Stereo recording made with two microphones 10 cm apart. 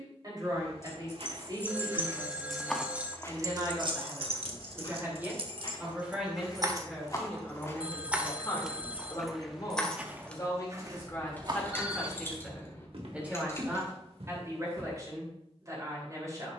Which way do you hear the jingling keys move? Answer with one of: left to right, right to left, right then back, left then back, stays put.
right then back.